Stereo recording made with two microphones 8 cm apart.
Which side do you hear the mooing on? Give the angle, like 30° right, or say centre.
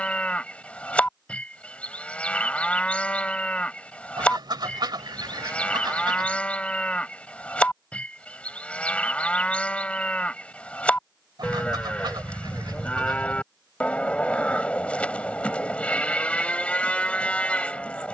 20° left.